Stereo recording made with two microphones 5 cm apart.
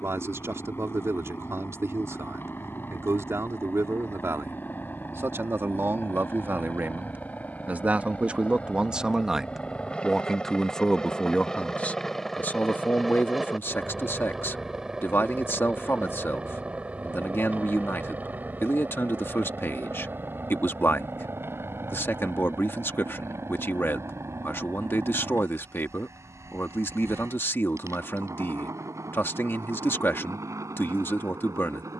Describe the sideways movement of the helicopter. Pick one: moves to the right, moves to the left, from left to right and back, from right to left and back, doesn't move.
moves to the right.